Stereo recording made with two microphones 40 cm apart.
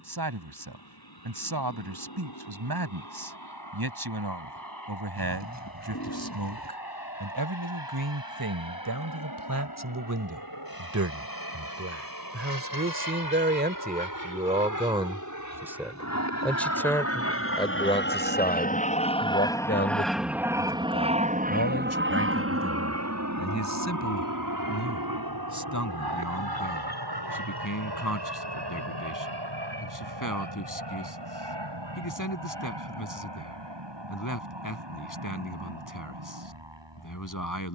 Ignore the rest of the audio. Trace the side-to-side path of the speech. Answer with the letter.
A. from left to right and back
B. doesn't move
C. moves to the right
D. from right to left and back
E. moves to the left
E.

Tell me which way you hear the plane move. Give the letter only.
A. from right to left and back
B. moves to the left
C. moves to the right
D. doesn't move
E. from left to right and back
C.